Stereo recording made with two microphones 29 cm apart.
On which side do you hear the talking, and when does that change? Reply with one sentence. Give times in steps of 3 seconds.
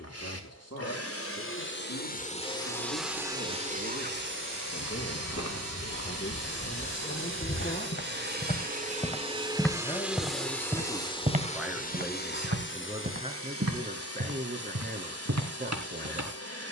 In this clip you hear the talking on the left from 0 s, in the centre from 9 s and on the right from 12 s.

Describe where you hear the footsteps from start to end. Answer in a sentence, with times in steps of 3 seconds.
In this clip you hear the footsteps not at all from 0 s, on the left from 3 s, in the centre from 9 s and on the right from 12 s.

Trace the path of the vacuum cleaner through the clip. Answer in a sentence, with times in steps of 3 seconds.
You can hear the vacuum cleaner on the left from 0 s, on the right from 3 s, in the centre from 9 s and on the left from 12 s.